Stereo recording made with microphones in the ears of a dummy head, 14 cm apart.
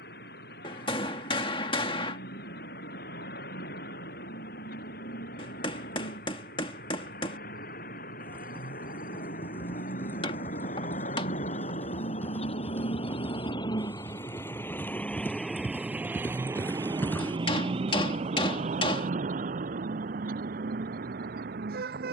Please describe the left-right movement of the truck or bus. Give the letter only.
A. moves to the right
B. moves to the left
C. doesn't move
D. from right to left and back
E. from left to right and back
A.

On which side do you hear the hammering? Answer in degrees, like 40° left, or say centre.
30° left.